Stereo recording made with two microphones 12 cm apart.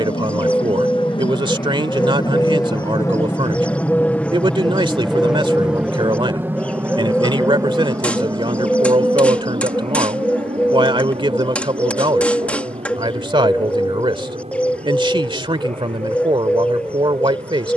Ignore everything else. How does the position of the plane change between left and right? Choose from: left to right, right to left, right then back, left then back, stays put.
left to right.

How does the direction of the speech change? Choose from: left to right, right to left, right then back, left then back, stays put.
stays put.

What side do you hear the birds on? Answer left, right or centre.
centre.